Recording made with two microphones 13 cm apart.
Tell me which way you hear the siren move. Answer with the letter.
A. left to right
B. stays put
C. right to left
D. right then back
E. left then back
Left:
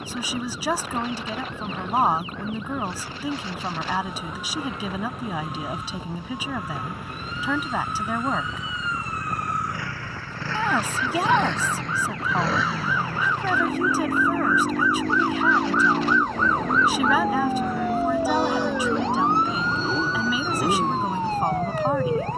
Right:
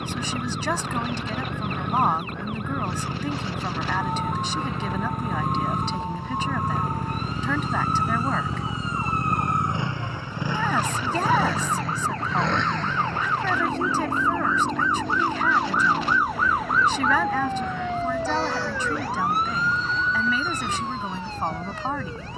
C.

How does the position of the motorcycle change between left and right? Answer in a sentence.
In this clip you hear the motorcycle travel towards the left.